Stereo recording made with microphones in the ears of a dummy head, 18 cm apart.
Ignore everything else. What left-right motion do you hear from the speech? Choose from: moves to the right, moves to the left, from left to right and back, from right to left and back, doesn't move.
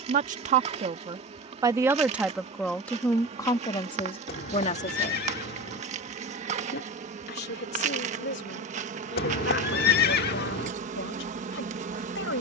moves to the left.